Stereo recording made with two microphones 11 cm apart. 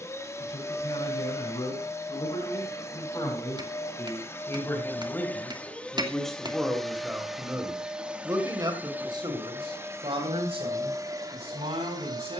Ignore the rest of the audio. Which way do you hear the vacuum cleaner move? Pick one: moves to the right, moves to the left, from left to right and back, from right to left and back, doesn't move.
moves to the right.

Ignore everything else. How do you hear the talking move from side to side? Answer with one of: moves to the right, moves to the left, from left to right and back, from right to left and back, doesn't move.
moves to the right.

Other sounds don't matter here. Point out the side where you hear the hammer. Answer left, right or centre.
right.